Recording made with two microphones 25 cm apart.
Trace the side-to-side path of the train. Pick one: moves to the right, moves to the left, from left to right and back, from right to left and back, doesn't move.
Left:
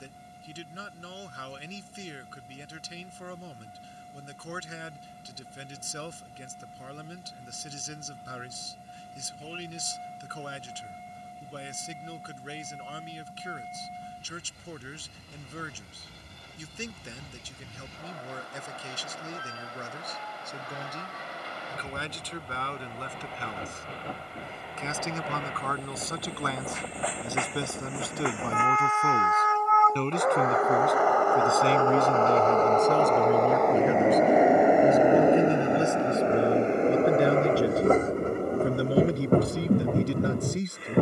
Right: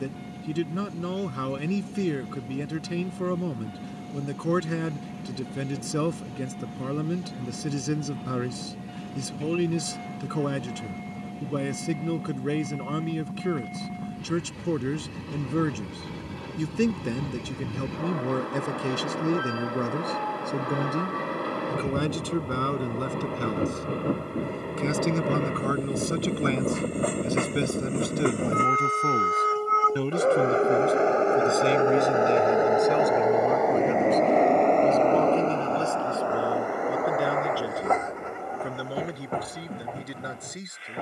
moves to the left.